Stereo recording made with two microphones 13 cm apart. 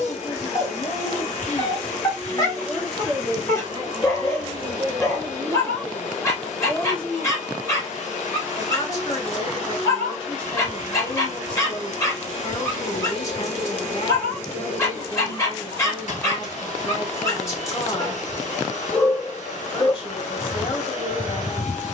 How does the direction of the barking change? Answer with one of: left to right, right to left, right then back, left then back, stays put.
stays put.